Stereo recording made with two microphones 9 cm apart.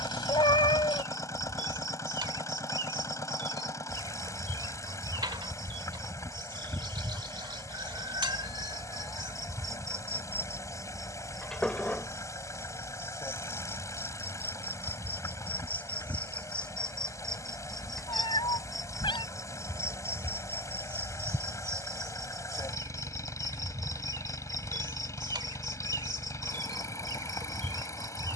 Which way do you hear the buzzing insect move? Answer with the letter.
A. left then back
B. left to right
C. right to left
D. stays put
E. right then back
A.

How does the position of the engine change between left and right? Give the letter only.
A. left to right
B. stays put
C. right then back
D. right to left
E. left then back
B.